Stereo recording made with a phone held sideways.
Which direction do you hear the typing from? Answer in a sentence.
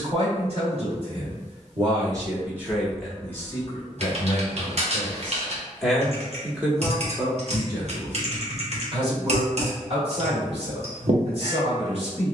You can hear the typing on the right.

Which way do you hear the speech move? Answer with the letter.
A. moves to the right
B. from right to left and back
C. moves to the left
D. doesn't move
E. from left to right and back
B.